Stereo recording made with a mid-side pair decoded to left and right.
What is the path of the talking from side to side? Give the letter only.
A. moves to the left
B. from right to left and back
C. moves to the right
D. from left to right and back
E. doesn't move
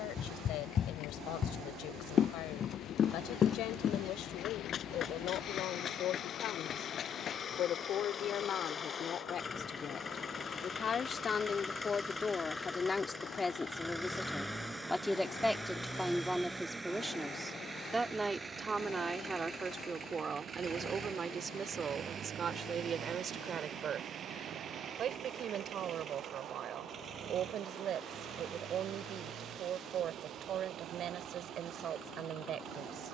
C.